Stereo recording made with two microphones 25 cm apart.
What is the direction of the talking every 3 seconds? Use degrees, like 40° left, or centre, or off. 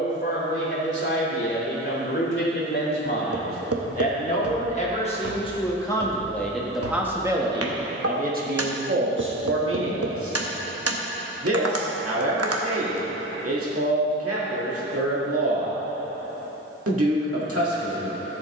40° left, 30° left, 20° right, 60° right, 70° right, 70° right.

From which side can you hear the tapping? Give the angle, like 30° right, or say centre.
70° right.